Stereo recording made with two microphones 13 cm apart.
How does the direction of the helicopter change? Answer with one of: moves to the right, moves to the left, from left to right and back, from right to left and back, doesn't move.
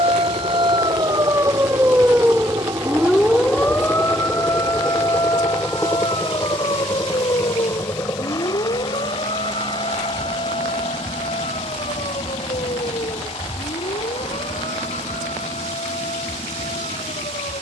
moves to the left.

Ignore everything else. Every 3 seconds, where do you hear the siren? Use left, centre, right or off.
right, left, left, left, left, left.